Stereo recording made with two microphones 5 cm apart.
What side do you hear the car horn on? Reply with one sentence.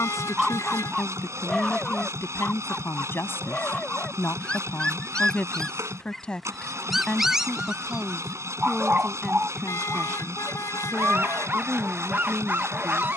In this clip you hear the car horn on the left.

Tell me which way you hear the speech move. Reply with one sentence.
In this clip you hear the speech travel towards the right.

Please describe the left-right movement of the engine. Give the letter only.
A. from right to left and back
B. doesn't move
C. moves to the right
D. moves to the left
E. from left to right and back
B.